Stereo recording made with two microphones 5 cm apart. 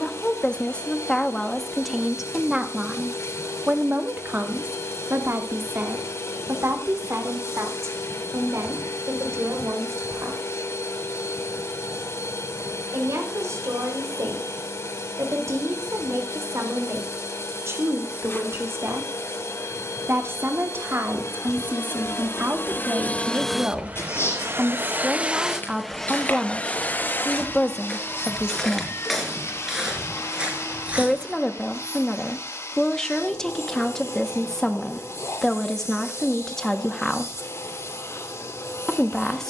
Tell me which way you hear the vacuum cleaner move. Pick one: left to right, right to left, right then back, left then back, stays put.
right then back.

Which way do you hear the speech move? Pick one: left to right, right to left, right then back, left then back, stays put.
right then back.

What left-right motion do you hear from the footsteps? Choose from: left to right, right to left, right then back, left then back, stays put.
left to right.